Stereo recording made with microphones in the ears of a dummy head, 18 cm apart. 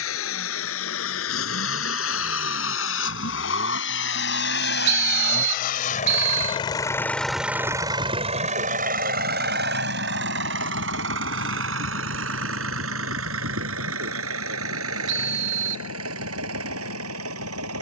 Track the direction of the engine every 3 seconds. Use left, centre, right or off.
left, left, centre, right, right, right.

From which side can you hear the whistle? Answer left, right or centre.
right.